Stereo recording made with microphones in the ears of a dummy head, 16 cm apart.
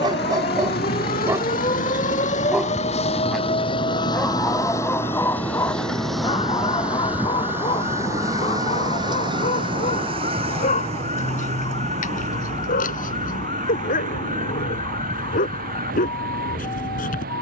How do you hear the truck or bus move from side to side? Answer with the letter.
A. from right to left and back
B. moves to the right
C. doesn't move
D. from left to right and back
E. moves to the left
B.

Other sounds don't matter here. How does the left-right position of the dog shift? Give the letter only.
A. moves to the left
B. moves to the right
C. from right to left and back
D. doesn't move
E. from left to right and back
A.